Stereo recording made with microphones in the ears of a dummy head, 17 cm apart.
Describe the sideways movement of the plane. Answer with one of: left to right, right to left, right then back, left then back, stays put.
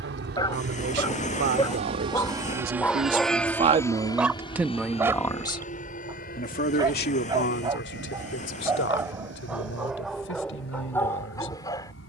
right to left.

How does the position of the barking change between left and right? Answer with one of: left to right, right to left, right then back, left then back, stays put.
right then back.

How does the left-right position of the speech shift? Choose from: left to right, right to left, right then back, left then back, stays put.
right to left.